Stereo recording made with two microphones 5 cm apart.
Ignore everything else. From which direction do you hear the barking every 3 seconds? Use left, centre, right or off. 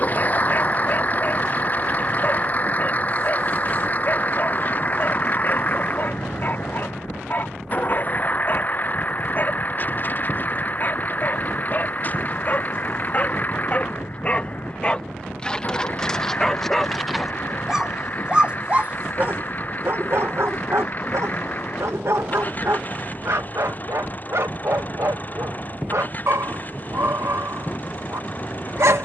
left, left, left, left, left, centre, right, right, right, right.